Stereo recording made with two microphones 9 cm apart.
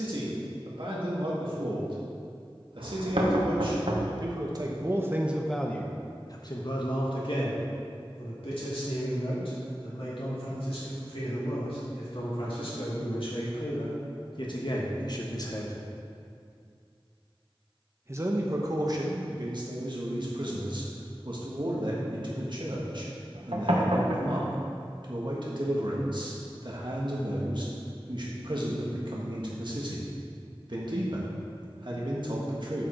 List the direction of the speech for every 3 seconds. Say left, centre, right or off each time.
right, right, left, left, left, left, right, right, right, right, right.